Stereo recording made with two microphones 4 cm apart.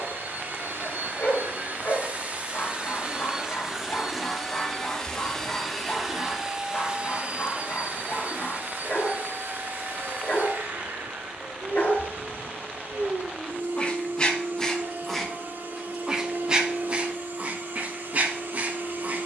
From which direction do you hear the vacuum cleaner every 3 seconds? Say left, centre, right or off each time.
right, centre, right, right, right, right, right.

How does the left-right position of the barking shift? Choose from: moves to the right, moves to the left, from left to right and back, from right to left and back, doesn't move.
moves to the right.